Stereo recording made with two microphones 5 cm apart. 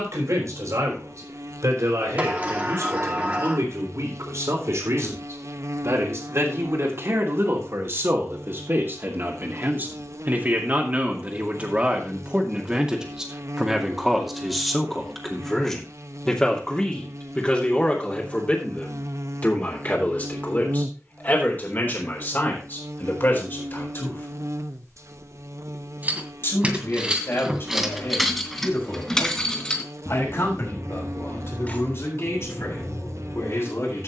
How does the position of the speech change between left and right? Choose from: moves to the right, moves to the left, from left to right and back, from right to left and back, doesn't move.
moves to the left.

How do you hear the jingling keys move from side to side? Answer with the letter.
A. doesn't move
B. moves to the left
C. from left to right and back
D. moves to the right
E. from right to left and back
B.